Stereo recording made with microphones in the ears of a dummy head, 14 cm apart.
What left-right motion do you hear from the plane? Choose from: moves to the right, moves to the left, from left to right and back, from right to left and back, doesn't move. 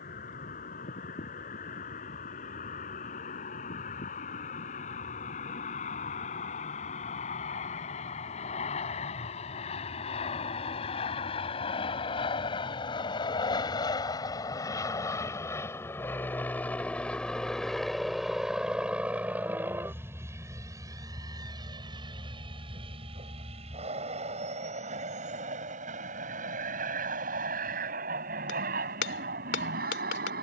moves to the right.